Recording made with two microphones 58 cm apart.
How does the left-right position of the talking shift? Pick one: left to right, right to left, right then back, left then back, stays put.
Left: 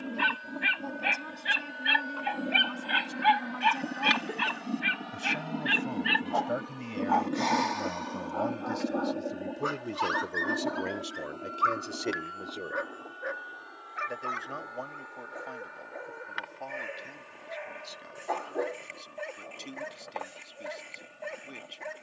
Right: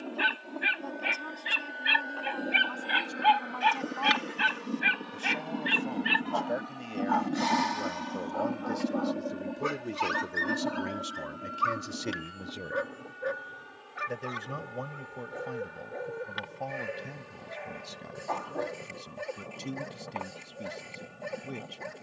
left to right.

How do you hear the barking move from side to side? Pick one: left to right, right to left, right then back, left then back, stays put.
left to right.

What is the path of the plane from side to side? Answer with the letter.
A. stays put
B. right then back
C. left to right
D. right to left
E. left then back
C.